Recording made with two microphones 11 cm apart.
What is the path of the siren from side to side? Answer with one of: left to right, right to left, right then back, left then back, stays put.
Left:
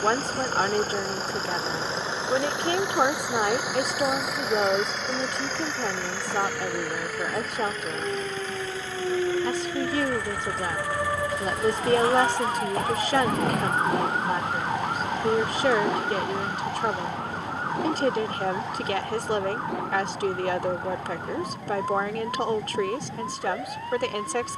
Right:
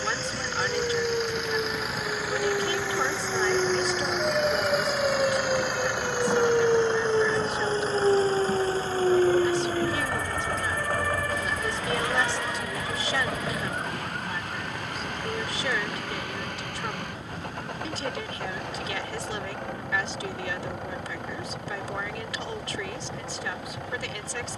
right to left.